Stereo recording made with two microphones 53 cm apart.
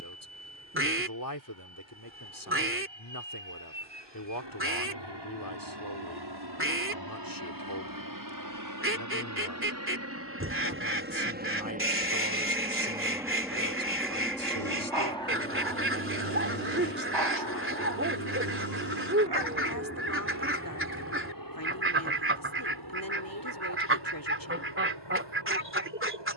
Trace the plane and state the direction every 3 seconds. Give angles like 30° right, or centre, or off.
70° right, 60° right, 40° right, 20° right, centre, 20° left, 30° left, 40° left, 50° left.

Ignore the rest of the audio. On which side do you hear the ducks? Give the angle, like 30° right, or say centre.
20° right.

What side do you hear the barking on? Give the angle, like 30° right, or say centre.
50° right.